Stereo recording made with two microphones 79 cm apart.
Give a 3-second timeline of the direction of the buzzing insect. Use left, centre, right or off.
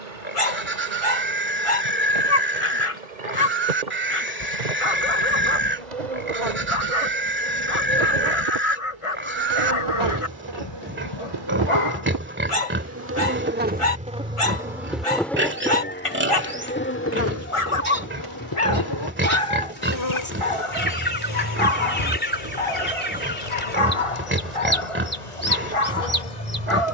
right, right, right, right, centre, centre, left, left, left.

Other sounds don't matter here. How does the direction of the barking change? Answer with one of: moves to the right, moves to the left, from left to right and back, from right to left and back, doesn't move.
doesn't move.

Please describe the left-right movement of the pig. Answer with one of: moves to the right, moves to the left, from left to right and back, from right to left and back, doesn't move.
doesn't move.